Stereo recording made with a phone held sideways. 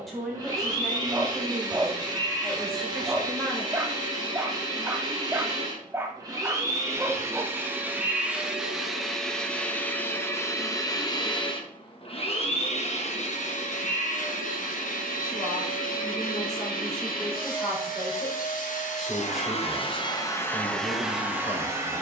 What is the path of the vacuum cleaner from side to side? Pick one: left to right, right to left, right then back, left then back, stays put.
left then back.